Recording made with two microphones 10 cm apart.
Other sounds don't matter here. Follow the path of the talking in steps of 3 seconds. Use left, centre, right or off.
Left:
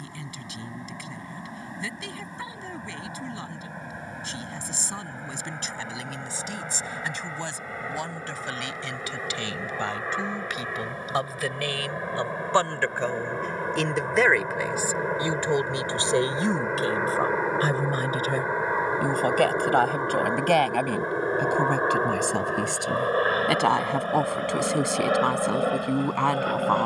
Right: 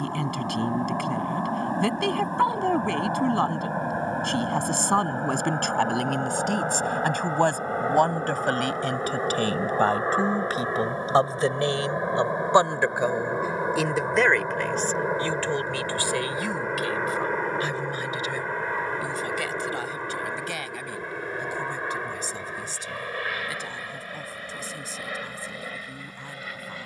right, right, right, right, centre, left, left, left, left.